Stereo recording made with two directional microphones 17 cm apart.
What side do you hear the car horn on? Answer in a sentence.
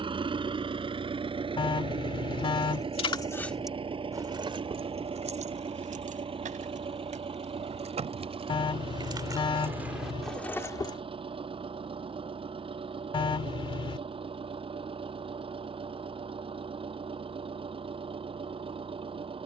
You can hear the car horn on the left.